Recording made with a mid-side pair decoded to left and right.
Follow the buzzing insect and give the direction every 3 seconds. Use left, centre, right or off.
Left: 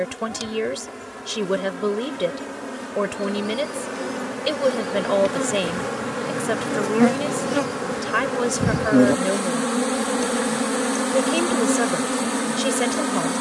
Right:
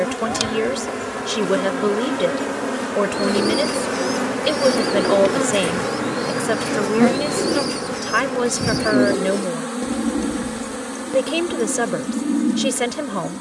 right, right, centre, left, left.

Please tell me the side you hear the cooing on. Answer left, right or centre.
right.